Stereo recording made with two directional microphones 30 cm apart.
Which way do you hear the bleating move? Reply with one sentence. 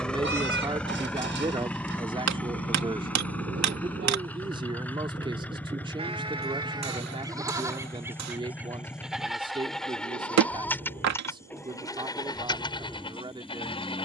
In this clip you hear the bleating travel towards the left.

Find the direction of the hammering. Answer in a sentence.
You can hear the hammering on the right.